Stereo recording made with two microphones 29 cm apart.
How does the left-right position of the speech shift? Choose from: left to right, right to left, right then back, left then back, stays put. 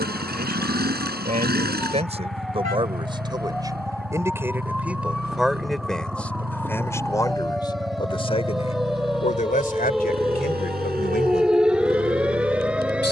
right to left.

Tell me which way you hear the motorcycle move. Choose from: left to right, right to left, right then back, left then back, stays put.
stays put.